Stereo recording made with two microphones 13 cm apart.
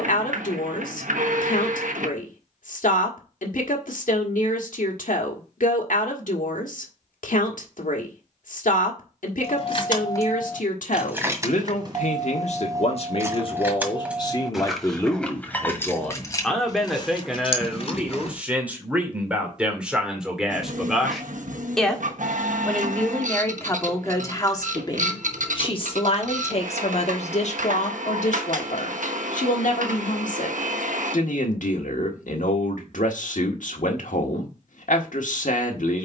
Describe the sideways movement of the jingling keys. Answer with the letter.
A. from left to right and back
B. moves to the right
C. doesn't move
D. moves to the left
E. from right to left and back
A.